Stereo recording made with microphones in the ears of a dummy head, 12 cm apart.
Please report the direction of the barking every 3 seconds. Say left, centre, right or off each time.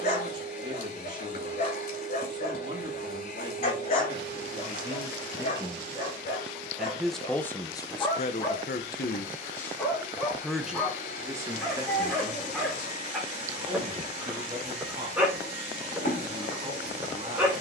left, left, left, centre, centre, centre.